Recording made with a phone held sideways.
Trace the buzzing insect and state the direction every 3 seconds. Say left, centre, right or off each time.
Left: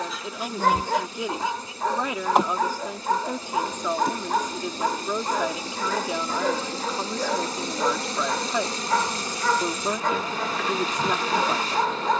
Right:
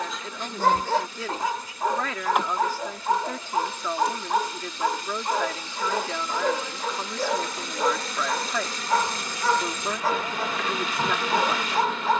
left, left, left, centre.